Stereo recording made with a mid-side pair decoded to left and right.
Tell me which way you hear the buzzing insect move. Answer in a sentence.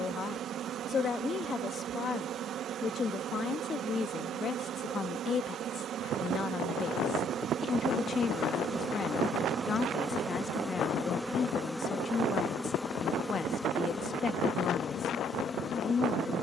You can hear the buzzing insect move to the left.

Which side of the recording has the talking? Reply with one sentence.
You can hear the talking on the left.